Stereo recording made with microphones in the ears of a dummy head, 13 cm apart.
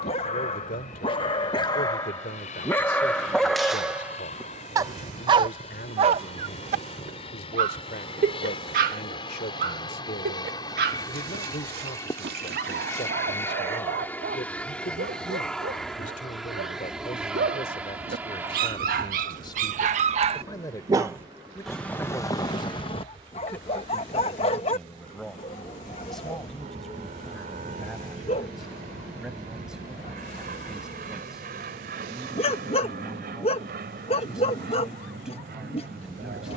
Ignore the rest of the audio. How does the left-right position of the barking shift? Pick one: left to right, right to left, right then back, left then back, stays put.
right then back.